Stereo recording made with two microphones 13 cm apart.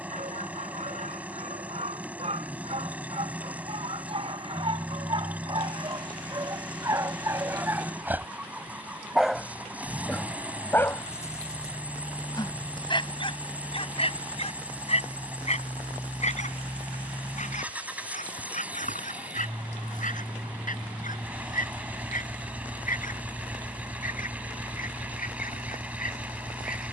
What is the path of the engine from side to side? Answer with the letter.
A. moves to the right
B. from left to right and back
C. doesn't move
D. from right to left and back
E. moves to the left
C.